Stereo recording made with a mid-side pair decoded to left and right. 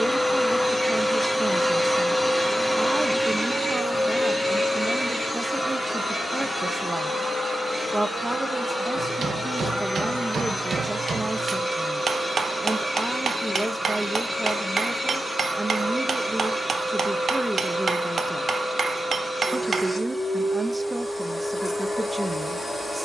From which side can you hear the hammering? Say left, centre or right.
right.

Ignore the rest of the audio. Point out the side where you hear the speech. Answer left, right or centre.
right.